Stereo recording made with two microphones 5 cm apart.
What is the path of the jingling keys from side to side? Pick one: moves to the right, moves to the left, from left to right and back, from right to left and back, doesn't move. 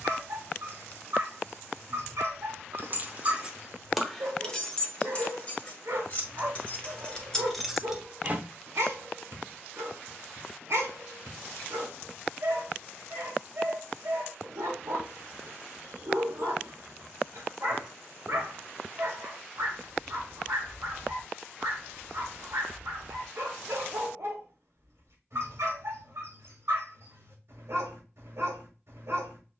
from right to left and back.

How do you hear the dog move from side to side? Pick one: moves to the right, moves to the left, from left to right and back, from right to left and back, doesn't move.
doesn't move.